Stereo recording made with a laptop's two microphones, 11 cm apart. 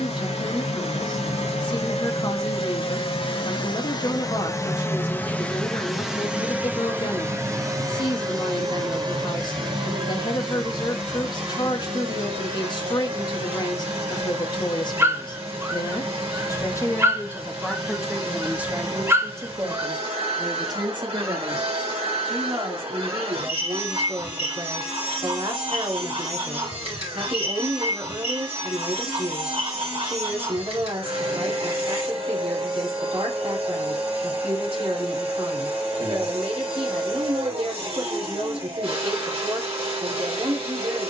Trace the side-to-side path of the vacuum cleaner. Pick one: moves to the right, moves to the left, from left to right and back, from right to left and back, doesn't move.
moves to the right.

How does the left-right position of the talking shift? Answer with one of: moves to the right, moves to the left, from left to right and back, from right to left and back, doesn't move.
moves to the right.